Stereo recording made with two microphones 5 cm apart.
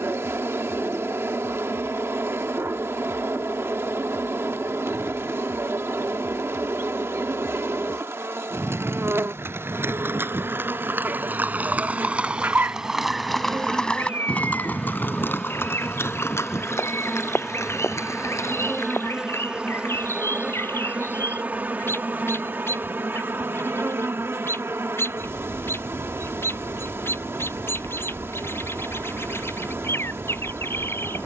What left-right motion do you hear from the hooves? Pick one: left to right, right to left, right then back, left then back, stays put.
right to left.